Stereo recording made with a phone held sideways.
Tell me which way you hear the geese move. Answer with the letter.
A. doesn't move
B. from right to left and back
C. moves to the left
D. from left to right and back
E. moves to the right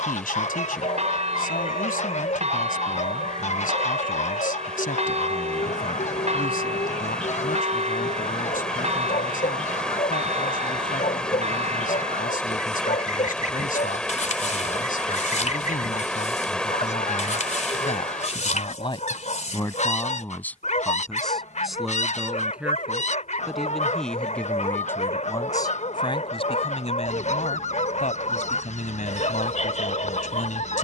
A.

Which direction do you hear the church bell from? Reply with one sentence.
You can hear the church bell on the right.